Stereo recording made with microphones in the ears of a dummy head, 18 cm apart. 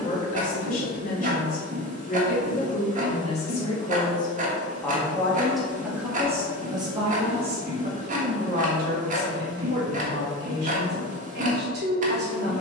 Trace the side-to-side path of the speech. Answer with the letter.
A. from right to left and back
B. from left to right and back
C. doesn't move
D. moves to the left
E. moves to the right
E.